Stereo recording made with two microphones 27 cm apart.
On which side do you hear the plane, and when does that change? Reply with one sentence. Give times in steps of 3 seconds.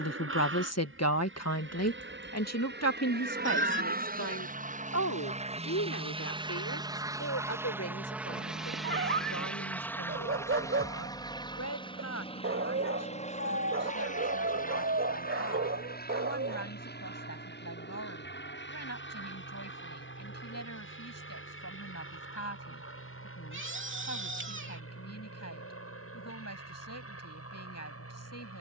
You can hear the plane on the right from 0 s, in the centre from 6 s and on the left from 12 s.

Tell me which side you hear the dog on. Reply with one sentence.
In this clip you hear the dog on the right.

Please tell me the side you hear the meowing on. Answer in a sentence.
You can hear the meowing on the right.